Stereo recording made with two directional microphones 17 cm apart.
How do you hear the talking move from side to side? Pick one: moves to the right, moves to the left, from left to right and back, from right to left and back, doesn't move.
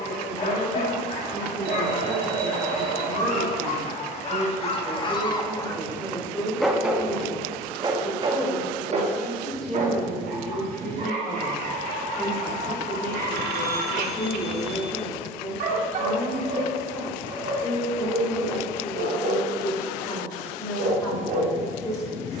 moves to the left.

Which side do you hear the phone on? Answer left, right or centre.
right.